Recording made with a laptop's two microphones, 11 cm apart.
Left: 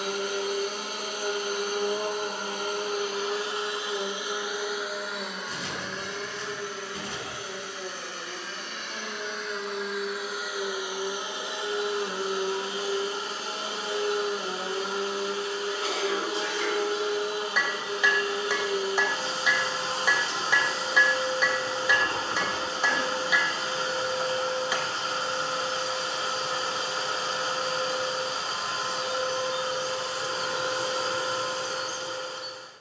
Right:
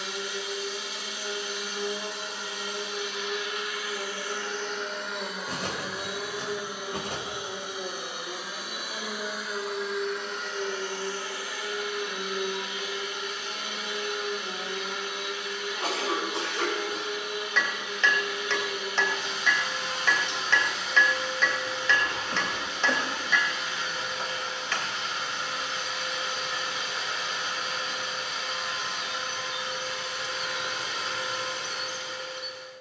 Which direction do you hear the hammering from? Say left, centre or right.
centre.